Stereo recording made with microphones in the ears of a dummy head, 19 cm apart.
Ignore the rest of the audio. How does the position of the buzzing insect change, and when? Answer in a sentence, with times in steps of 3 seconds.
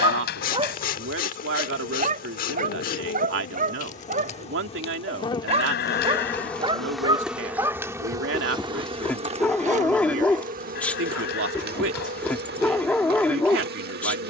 You can hear the buzzing insect on the left from 0 s, in the centre from 6 s and on the right from 9 s.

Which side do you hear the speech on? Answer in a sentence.
In this clip you hear the speech on the right.